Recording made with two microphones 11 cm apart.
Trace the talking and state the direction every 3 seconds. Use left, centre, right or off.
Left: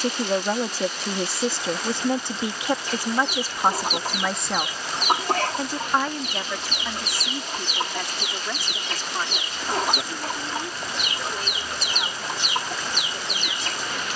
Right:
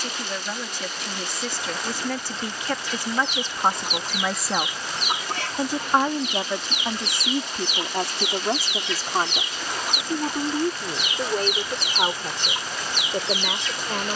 left, centre, right, right, right.